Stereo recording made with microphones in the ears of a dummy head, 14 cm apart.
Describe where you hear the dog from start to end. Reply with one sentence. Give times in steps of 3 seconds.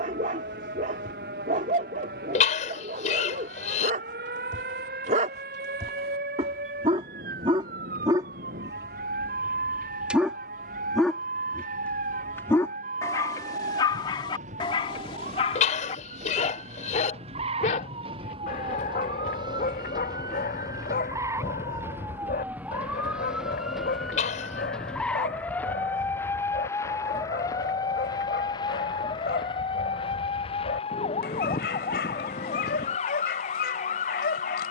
In this clip you hear the dog on the right from 0 s, in the centre from 9 s and on the left from 12 s.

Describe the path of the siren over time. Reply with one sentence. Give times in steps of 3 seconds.
In this clip you hear the siren on the right from 0 s, in the centre from 21 s and on the left from 27 s.